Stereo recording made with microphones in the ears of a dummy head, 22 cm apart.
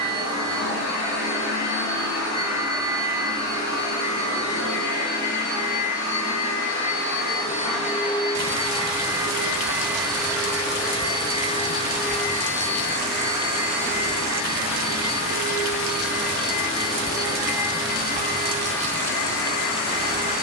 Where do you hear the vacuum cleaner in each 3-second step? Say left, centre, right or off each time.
left, left, left, centre, left, left, left.